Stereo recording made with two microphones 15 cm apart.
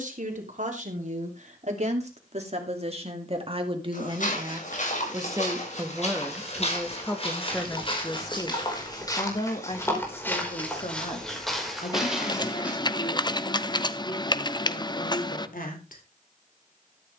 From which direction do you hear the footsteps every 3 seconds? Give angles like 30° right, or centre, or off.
off, 60° left, 40° left, 10° left, 10° right, off.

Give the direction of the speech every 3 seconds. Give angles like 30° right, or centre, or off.
50° right, 30° right, 10° left, 40° left, 60° left, 70° left.